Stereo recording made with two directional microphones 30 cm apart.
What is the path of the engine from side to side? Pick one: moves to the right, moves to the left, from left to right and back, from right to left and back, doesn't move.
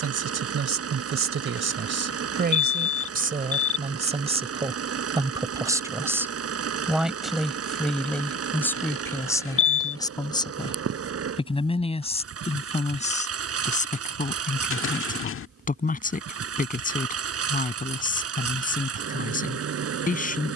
doesn't move.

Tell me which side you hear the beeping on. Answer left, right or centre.
left.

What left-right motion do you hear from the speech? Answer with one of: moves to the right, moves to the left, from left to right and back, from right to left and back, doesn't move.
moves to the left.